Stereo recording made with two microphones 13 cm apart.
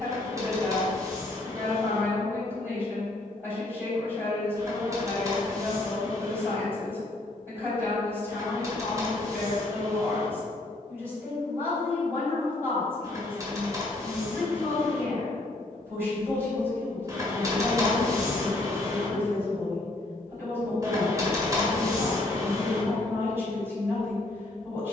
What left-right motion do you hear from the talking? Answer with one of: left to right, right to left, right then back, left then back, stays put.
stays put.